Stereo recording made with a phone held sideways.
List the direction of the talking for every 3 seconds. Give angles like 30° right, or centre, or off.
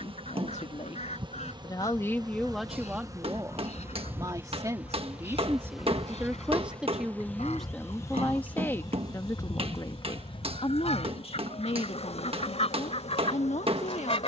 30° left, 20° right, centre, 40° left, 60° left.